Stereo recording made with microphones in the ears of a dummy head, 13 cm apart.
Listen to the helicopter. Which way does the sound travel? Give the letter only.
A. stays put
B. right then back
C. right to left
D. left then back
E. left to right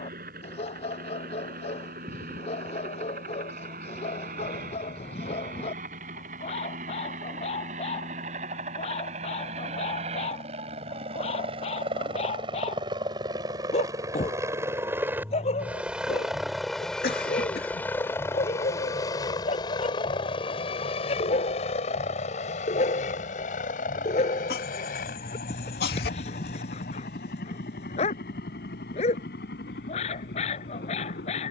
C.